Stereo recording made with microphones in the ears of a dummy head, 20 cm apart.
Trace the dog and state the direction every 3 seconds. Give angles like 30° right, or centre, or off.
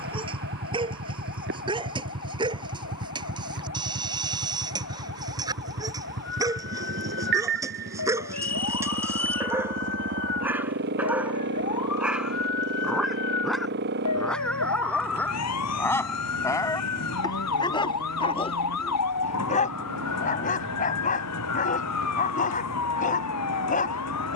20° right, 20° right, 10° right, 10° right, centre, 10° left, 30° left, 40° left.